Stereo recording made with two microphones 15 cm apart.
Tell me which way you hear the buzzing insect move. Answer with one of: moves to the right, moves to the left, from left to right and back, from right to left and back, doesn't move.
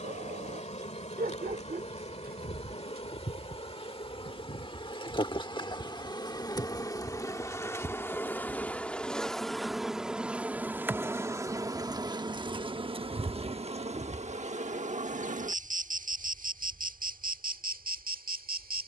moves to the right.